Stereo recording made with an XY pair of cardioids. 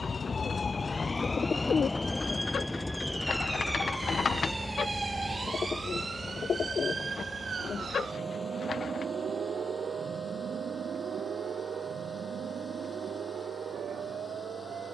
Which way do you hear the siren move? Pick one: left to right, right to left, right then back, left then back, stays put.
left to right.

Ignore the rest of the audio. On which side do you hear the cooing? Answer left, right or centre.
left.